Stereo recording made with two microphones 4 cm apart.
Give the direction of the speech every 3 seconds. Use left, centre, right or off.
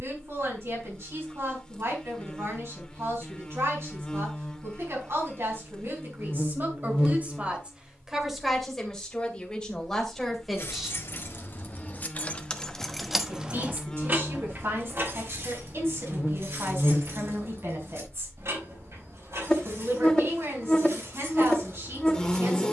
right, right, right, centre, right, right, right, right.